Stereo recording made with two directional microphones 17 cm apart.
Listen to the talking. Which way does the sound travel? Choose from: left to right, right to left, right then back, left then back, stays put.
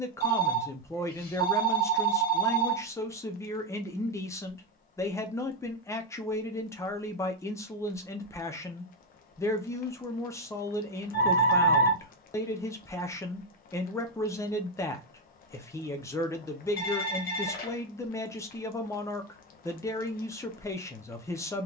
stays put.